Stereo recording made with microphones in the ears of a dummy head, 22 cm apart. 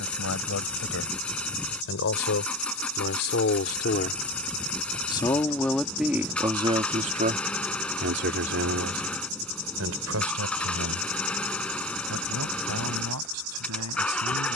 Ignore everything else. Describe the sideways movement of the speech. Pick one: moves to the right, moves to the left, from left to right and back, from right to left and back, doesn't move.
moves to the right.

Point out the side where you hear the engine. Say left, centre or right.
centre.